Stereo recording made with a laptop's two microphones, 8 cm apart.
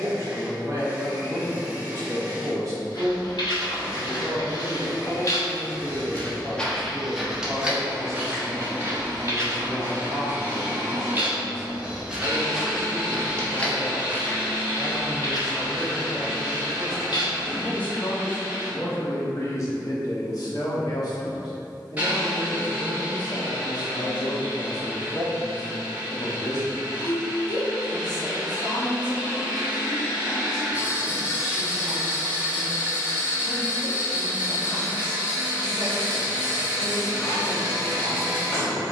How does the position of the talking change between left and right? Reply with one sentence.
You can hear the talking move to the left.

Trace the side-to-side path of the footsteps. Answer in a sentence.
In this clip you hear the footsteps move from left to right and back again.